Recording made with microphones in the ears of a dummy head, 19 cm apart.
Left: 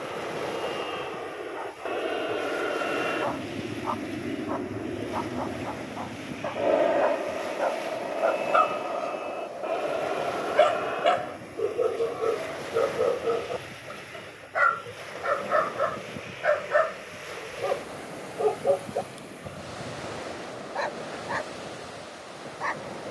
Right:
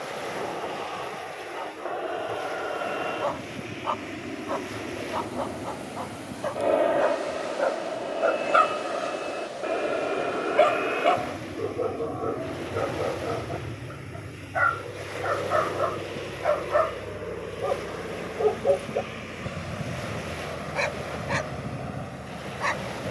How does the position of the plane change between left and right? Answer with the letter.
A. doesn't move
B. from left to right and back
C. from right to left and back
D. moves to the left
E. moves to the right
E.